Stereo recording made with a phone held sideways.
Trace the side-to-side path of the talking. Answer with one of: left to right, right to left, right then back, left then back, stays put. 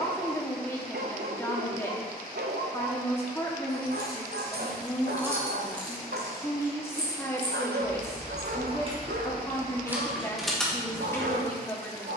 stays put.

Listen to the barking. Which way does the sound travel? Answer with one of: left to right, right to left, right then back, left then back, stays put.
stays put.